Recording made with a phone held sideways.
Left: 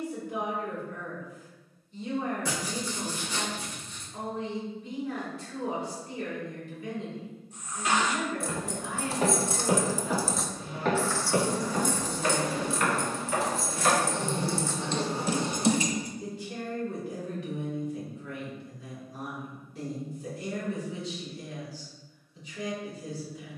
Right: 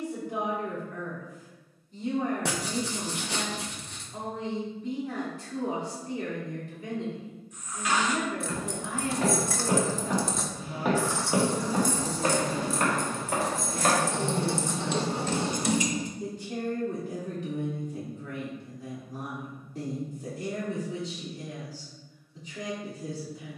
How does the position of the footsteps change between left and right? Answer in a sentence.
You can hear the footsteps go from the left side to the right.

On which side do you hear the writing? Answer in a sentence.
In this clip you hear the writing on the right.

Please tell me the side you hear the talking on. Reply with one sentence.
In this clip you hear the talking on the right.